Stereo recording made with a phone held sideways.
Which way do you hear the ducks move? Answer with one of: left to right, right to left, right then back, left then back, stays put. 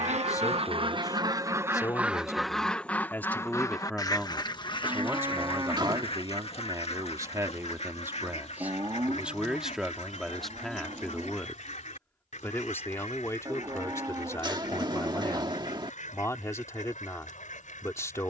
right to left.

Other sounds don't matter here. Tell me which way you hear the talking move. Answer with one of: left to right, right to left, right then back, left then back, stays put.
right then back.